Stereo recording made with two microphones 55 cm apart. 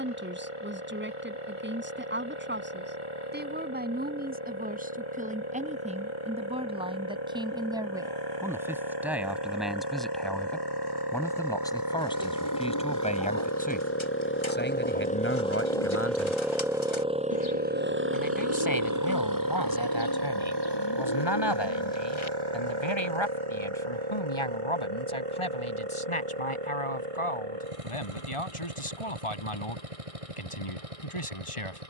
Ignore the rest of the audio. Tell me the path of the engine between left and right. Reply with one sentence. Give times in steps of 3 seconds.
You can hear the engine on the left from 0 s, in the centre from 15 s and on the right from 18 s.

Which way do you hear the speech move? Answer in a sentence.
You can hear the speech move from right to left.